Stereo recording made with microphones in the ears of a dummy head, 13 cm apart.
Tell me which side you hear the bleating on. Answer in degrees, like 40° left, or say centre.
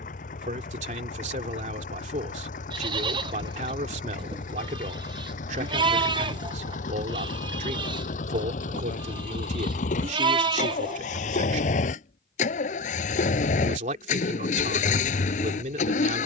30° right.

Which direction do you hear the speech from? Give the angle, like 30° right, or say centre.
50° right.